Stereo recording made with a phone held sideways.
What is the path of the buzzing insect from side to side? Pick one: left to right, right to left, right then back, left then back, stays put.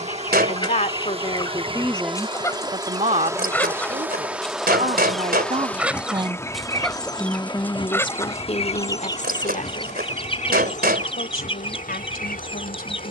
right to left.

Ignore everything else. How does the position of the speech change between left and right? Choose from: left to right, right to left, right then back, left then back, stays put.
right then back.